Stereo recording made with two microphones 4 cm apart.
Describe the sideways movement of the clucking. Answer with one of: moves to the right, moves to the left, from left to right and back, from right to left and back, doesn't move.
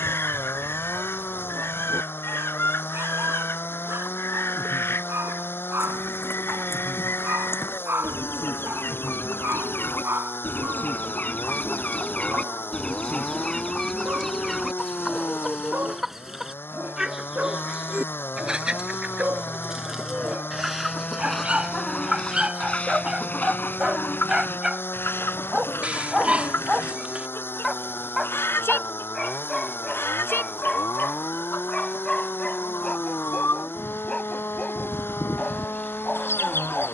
from left to right and back.